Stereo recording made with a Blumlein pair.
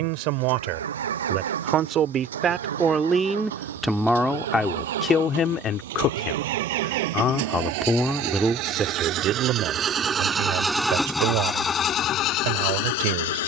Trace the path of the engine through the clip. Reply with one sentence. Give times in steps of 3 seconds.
You can hear the engine on the right from 0 s, in the centre from 9 s and on the left from 12 s.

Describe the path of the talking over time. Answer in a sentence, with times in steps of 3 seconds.
You can hear the talking on the right from 0 s, in the centre from 3 s and on the right from 9 s.